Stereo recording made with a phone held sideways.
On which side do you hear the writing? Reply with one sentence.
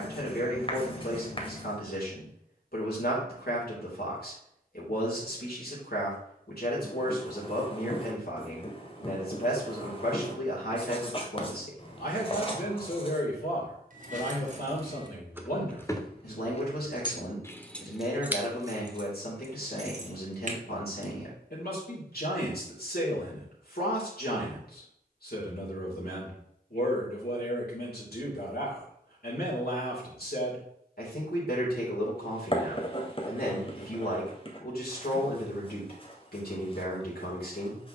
You can hear the writing on the left.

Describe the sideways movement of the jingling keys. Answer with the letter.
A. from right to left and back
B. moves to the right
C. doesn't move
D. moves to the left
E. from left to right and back
A.